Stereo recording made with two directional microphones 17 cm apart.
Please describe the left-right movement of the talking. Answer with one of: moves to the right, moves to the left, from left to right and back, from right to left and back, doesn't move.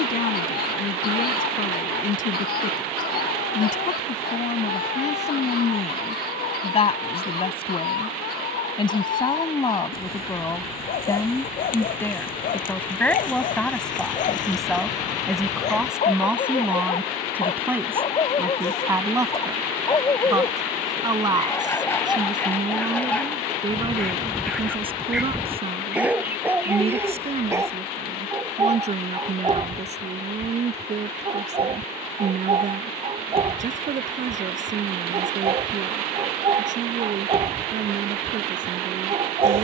moves to the right.